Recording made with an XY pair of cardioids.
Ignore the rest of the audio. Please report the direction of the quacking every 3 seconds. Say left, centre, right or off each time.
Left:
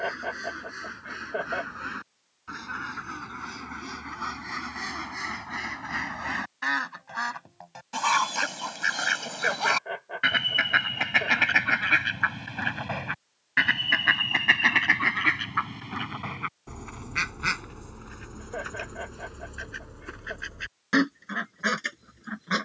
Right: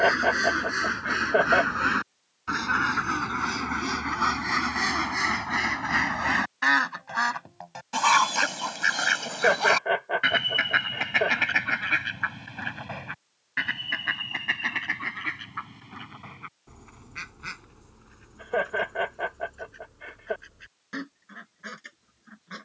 right, right, right, centre, left, left, left, left.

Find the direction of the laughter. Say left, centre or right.
right.